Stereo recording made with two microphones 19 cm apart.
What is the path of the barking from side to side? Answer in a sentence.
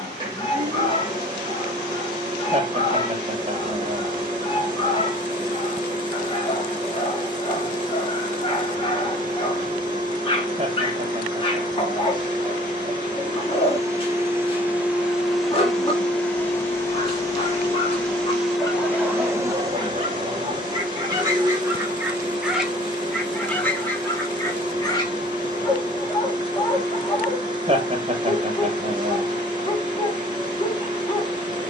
In this clip you hear the barking go right and come back.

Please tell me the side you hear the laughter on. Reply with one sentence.
You can hear the laughter on the right.